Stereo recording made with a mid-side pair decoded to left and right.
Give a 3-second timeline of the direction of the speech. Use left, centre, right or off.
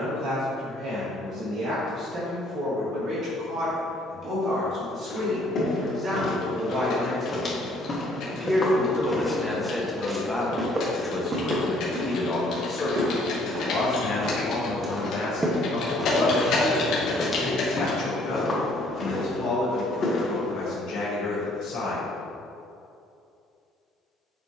right, right, right, centre, left, left, left, left.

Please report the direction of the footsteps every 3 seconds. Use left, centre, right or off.
off, left, left, right, right, centre, left, off.